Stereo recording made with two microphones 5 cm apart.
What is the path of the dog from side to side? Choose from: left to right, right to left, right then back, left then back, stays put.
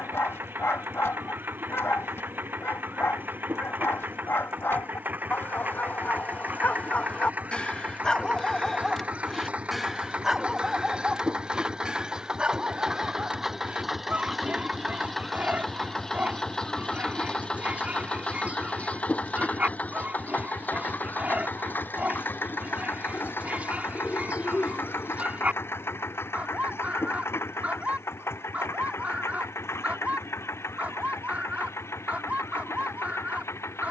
left to right.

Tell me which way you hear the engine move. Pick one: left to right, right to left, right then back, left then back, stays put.
right to left.